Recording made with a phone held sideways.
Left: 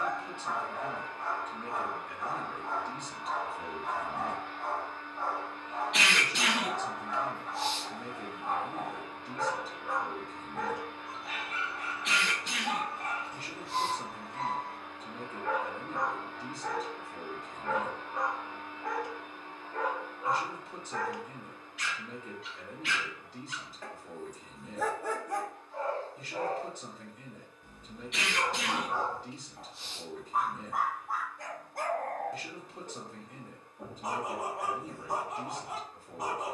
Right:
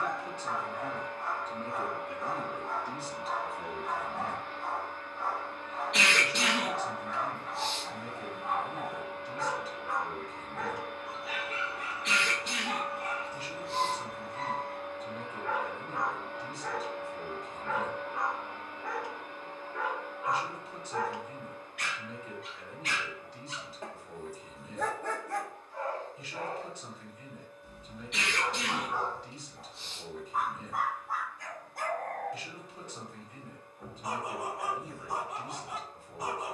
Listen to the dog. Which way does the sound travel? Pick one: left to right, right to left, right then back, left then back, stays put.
right then back.